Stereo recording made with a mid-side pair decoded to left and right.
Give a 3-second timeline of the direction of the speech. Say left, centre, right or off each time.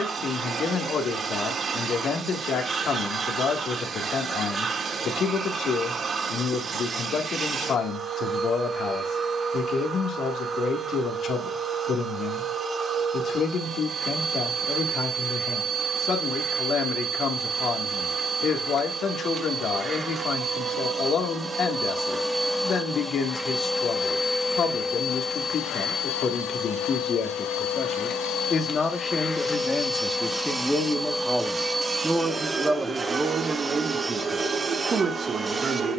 left, left, left, left, left, left, left, left, left, left, centre, right.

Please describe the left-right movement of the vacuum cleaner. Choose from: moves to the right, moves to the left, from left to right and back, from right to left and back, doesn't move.
from right to left and back.